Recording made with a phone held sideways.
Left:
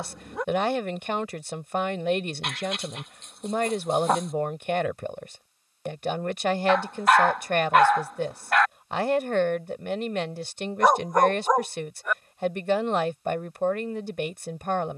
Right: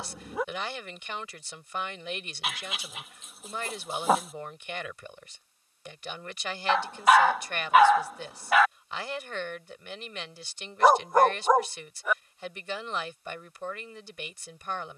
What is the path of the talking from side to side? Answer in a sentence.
You can hear the talking stay put.